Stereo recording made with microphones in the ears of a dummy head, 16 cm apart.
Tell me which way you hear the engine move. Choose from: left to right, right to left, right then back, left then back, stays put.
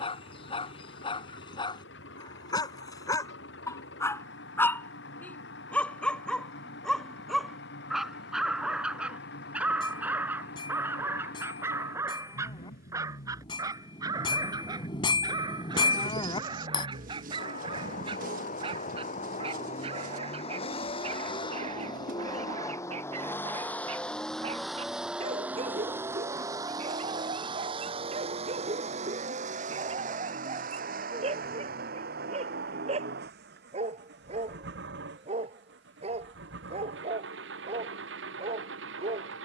left to right.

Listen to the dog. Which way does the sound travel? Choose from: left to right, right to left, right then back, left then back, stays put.
left to right.